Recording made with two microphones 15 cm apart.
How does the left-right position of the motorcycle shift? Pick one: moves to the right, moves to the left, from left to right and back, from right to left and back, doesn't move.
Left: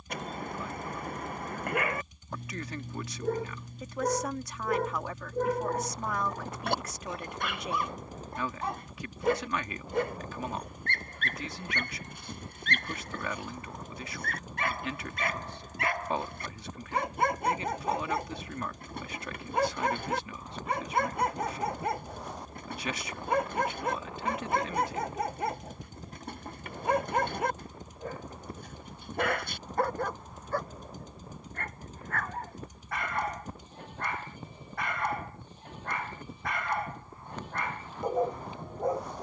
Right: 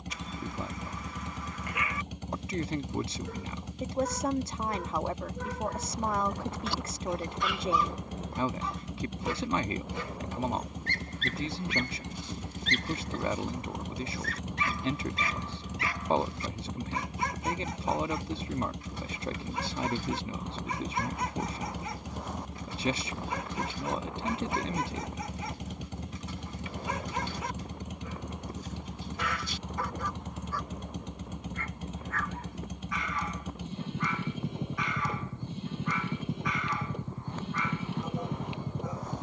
doesn't move.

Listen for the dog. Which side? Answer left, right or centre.
left.